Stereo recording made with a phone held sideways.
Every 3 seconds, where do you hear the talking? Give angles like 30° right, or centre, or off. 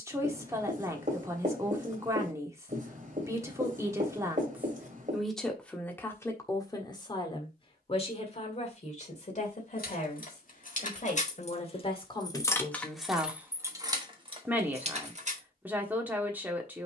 20° right, 10° right, 30° left, 50° left, centre, 10° right.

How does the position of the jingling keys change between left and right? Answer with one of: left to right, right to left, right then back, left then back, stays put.
left to right.